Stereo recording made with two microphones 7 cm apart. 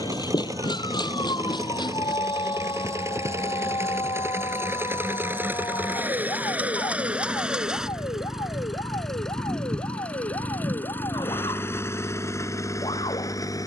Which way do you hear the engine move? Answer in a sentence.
You can hear the engine move to the left.